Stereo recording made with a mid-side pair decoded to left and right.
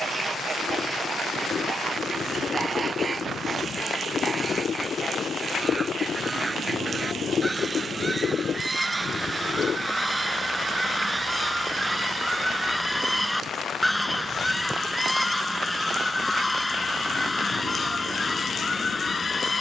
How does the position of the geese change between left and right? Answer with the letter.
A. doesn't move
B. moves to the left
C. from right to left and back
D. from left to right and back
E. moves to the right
B.